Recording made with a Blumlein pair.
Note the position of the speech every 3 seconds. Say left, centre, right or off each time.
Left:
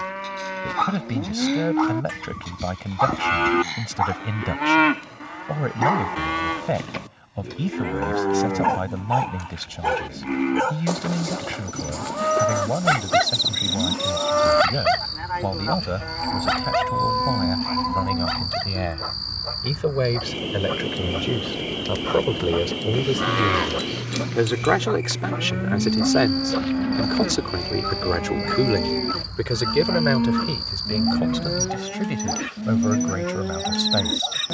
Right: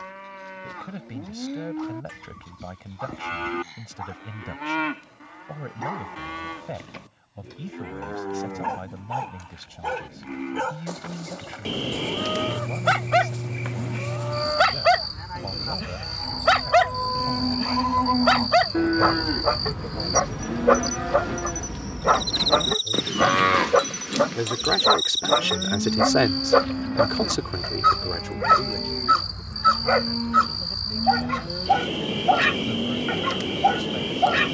left, left, left, left, left, left, left, left, centre, left, left, left.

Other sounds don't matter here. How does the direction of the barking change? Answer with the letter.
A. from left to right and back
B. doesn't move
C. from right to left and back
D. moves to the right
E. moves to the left
D.